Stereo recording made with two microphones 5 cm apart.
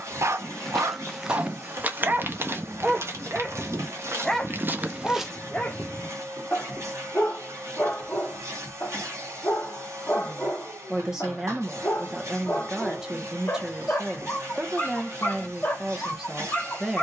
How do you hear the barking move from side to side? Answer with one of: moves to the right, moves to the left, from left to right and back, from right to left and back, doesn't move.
moves to the left.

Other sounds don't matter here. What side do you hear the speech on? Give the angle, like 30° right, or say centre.
10° right.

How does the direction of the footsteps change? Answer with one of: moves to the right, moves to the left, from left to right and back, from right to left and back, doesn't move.
from left to right and back.